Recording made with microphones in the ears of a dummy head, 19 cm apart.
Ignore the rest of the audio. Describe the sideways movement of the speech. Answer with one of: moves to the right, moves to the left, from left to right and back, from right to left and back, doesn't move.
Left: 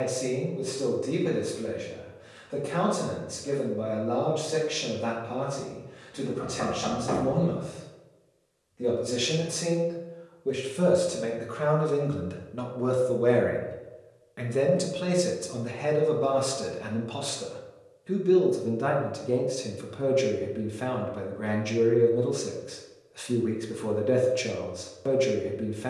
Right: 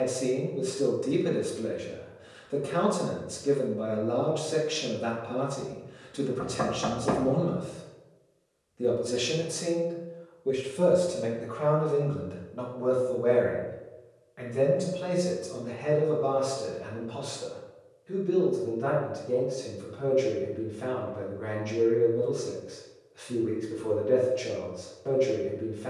moves to the left.